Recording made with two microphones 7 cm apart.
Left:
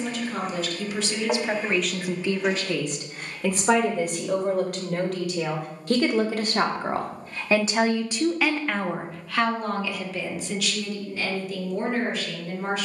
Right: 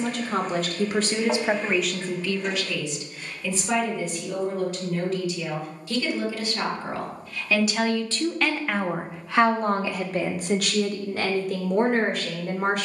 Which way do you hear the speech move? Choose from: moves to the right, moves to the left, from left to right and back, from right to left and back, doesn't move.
from right to left and back.